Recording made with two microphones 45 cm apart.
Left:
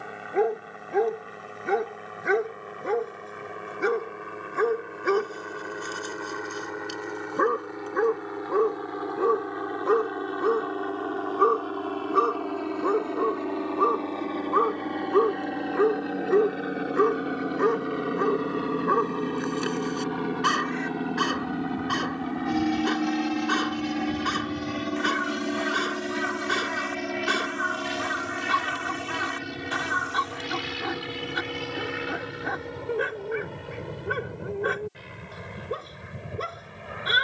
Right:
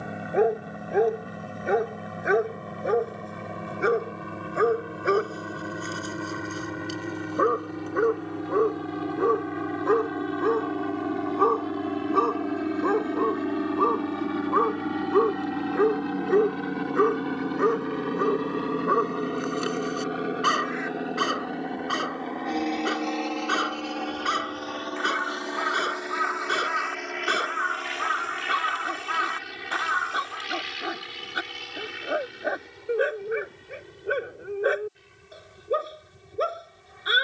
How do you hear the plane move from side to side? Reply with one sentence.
In this clip you hear the plane travel towards the left.